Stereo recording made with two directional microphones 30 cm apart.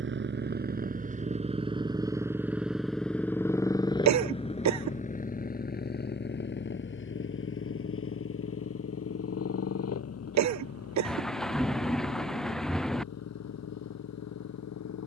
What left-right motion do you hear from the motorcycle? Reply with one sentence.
In this clip you hear the motorcycle travel towards the left.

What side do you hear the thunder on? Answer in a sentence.
In this clip you hear the thunder in the centre.